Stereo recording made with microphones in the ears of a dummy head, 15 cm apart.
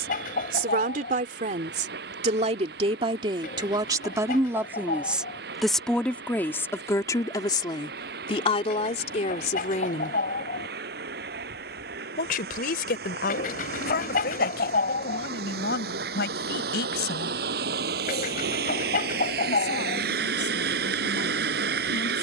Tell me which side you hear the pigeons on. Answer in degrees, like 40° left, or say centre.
50° left.